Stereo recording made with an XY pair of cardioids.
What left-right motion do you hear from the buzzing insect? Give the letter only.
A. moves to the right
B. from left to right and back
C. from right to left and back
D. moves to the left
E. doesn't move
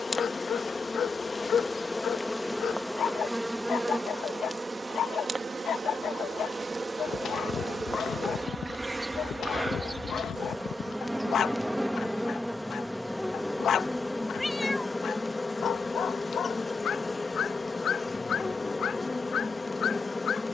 B.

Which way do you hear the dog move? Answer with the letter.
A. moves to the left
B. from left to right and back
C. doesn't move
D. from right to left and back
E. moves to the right
C.